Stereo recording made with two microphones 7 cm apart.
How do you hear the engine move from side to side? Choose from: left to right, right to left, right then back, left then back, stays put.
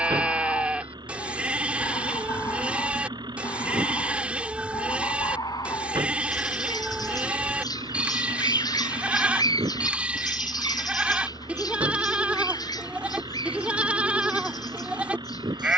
stays put.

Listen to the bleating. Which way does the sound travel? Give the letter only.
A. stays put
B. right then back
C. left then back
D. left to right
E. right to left
A.